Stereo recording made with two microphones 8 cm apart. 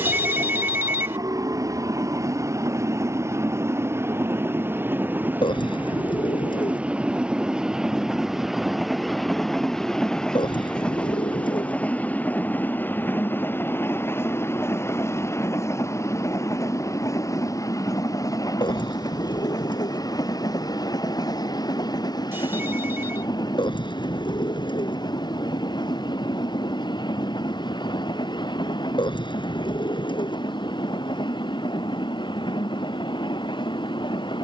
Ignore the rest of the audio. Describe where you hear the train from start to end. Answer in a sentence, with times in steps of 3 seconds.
In this clip you hear the train on the right from 0 s, in the centre from 6 s and on the left from 12 s.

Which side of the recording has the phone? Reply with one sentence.
You can hear the phone on the right.